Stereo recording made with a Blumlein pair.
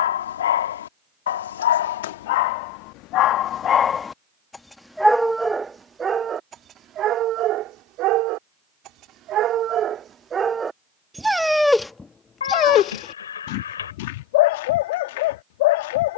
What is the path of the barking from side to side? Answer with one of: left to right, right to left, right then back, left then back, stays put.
right then back.